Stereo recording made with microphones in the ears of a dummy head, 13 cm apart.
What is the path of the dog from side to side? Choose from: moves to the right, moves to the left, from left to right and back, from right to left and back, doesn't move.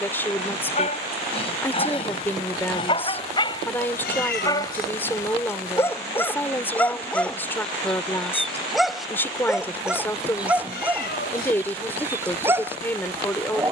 moves to the right.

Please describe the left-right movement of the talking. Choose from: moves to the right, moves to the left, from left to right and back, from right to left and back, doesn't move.
doesn't move.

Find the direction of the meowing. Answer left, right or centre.
left.